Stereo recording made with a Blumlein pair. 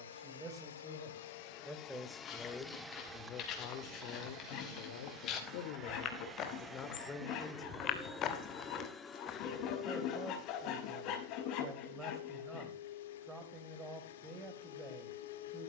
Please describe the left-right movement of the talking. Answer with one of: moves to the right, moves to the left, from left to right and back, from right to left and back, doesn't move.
from right to left and back.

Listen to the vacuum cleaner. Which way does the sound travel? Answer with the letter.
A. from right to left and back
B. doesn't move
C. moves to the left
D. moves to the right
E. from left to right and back
E.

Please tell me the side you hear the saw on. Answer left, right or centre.
left.